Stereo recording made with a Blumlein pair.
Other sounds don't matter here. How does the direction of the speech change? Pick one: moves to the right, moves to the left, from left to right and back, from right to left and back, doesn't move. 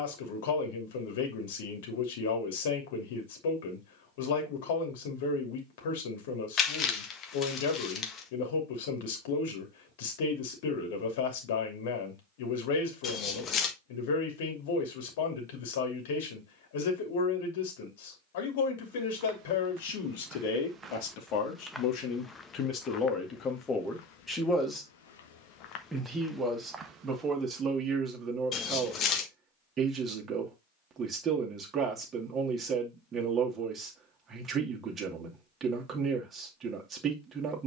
moves to the right.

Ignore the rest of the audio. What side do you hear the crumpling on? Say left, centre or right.
left.